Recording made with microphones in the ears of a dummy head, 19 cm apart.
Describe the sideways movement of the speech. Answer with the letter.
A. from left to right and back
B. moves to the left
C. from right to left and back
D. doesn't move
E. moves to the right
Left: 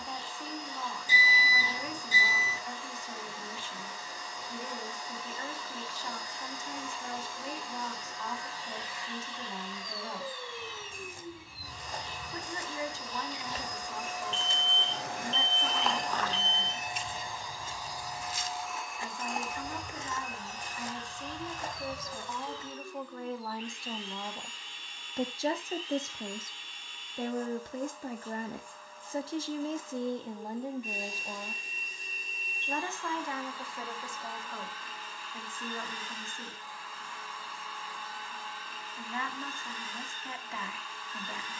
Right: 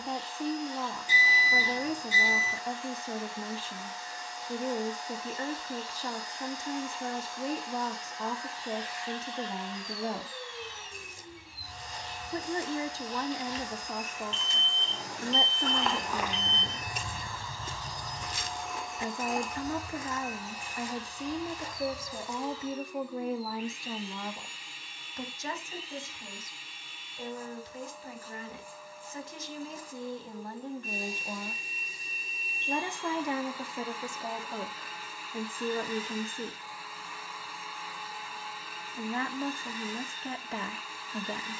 C.